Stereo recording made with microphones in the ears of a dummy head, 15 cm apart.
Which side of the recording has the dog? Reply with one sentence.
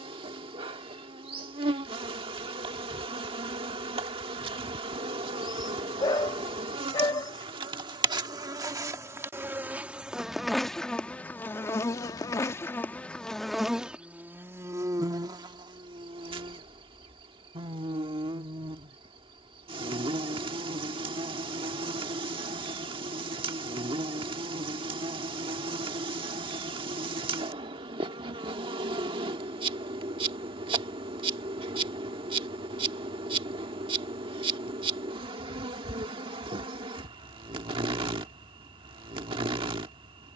In this clip you hear the dog on the left.